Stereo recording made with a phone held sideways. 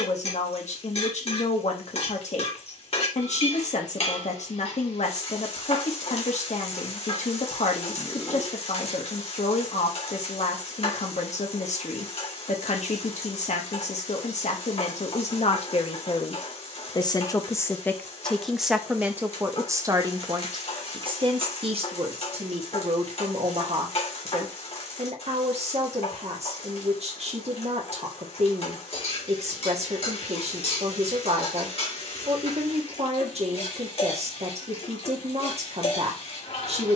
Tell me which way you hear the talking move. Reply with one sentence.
In this clip you hear the talking go from the left side to the right.